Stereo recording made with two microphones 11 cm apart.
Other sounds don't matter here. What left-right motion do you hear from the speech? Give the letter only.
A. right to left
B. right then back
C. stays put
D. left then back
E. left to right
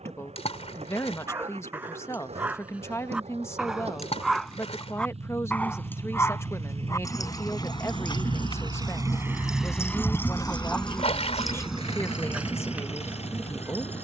C.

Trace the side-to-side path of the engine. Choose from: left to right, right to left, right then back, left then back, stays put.
right to left.